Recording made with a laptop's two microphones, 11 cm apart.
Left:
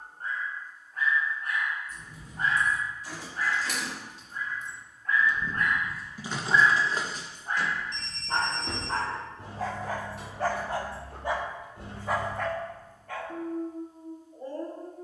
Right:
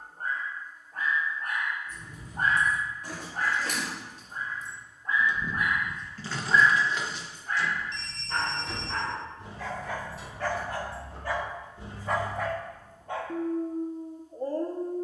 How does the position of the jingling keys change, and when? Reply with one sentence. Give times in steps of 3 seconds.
You can hear the jingling keys on the right from 0 s and on the left from 6 s.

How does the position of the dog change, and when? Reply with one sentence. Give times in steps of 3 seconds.
In this clip you hear the dog on the right from 0 s, on the left from 6 s and on the right from 12 s.